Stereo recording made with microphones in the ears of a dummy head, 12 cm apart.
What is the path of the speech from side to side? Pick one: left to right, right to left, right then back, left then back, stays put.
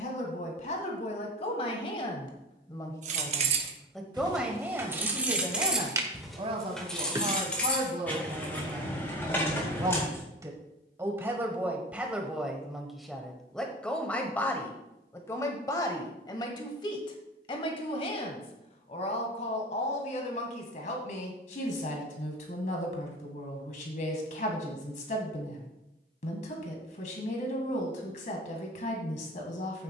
right then back.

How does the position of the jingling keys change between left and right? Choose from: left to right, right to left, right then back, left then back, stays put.
right to left.